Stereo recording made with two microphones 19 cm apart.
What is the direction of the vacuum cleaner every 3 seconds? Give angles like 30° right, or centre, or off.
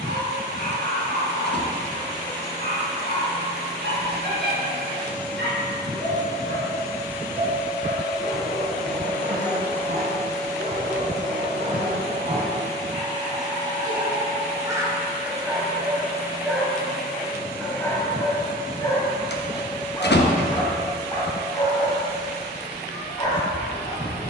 50° right, 30° right, 10° right, 20° left, 40° left, 60° left, 70° left, 70° left.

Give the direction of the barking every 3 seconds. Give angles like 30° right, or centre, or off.
60° right, 60° right, 60° right, 50° right, 30° right, centre, 20° left, 20° left.